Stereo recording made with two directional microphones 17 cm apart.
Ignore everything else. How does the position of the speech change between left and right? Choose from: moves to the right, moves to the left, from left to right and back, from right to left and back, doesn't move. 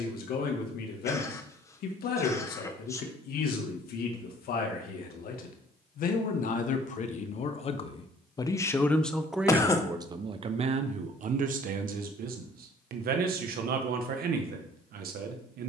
moves to the right.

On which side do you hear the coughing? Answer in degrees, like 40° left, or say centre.
20° left.